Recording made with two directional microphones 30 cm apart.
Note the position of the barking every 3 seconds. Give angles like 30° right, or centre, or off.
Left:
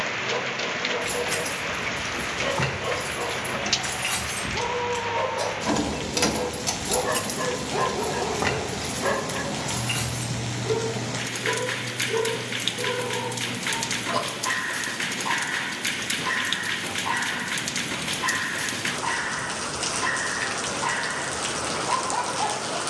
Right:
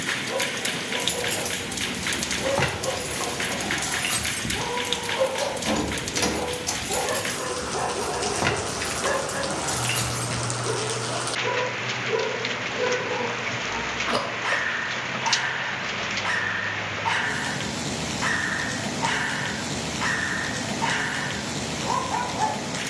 30° left, 30° left, 20° left, 20° right, 40° right, 50° right, 50° right, 50° right.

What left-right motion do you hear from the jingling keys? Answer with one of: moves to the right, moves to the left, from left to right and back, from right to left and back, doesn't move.
from right to left and back.